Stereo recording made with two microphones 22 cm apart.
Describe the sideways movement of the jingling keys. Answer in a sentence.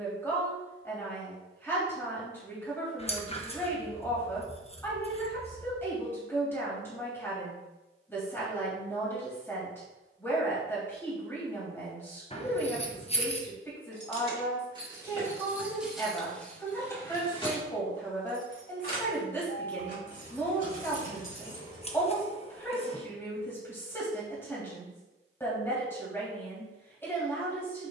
In this clip you hear the jingling keys move to the left.